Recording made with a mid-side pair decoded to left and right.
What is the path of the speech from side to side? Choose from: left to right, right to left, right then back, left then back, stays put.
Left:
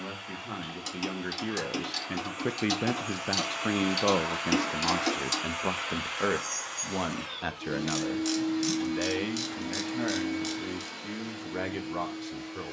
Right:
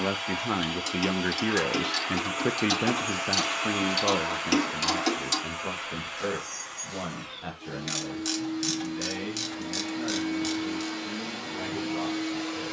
right to left.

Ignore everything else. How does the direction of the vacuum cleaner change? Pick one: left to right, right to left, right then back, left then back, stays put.
left then back.